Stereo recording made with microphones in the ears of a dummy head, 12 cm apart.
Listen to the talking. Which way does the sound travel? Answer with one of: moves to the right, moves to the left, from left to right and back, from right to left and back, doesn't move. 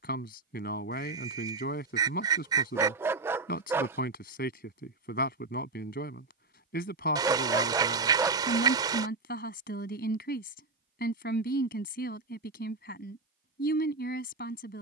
doesn't move.